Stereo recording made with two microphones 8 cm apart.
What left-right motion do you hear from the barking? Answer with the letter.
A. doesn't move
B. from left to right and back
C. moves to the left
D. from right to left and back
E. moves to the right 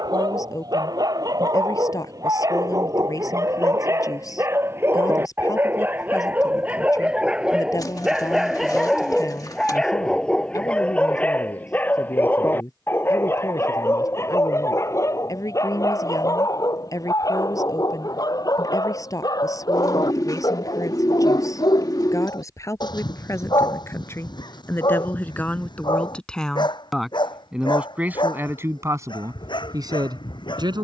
C.